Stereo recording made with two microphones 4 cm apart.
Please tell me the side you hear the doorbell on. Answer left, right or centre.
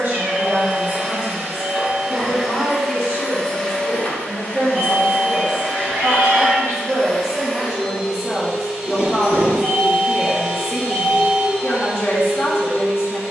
centre.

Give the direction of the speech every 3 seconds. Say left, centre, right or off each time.
right, right, centre, left, left.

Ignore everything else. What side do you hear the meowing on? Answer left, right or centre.
right.